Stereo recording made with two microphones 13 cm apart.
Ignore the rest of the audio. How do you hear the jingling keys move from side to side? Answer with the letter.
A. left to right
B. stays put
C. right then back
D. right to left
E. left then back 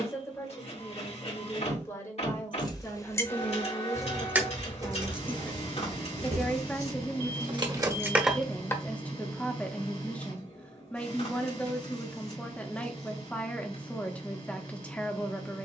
C.